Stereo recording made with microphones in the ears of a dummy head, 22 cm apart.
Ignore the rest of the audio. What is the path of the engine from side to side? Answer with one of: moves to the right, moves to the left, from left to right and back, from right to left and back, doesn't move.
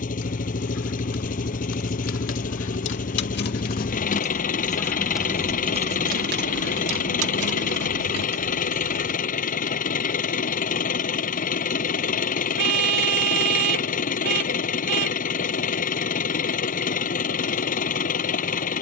doesn't move.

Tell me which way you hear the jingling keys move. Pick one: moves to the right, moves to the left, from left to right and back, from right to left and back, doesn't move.
moves to the right.